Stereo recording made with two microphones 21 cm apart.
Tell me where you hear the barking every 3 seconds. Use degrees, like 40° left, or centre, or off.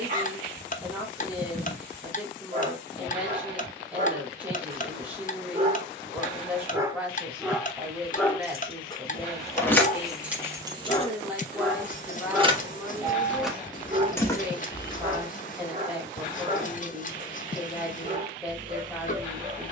40° right, 30° right, centre, 20° left, 20° right, 40° right, 40° right.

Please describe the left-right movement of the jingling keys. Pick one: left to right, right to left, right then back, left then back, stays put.
right then back.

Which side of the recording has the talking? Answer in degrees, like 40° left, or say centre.
10° right.